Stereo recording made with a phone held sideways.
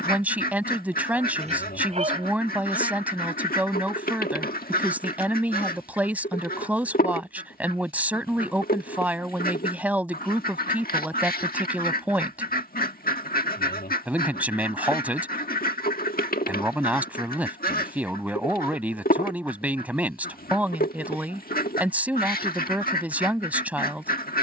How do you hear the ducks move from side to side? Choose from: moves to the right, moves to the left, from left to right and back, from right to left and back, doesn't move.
doesn't move.